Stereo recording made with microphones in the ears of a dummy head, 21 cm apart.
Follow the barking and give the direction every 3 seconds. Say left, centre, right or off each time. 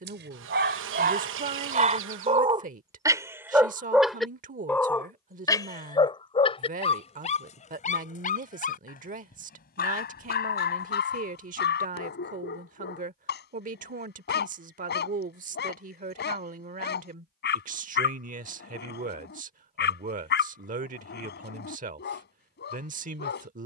right, centre, left, left, left, left, left, left.